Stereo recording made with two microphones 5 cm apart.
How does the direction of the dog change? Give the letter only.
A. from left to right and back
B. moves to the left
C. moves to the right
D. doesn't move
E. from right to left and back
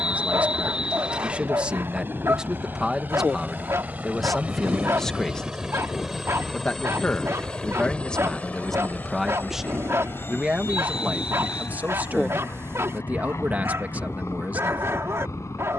D.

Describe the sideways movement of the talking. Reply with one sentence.
In this clip you hear the talking move from right to left and back again.